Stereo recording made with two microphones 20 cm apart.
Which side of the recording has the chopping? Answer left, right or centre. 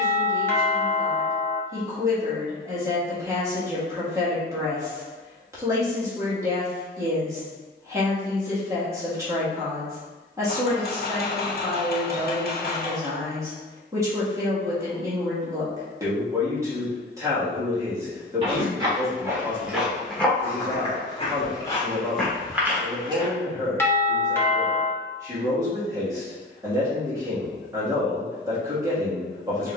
left.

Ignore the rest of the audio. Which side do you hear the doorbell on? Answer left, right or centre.
centre.